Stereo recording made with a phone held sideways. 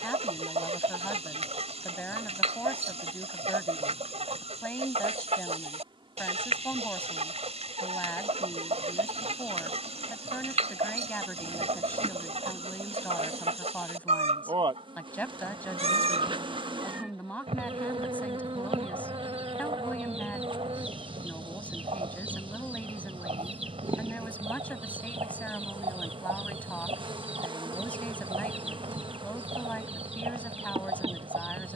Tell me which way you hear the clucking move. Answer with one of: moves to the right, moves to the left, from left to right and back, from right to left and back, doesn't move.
doesn't move.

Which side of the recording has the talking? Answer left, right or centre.
centre.